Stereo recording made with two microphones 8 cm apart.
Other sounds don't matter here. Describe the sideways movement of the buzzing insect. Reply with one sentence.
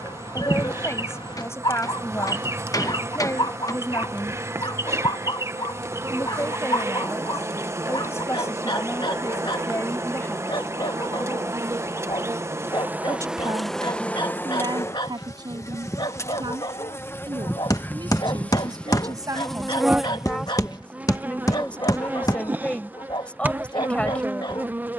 You can hear the buzzing insect go left and come back.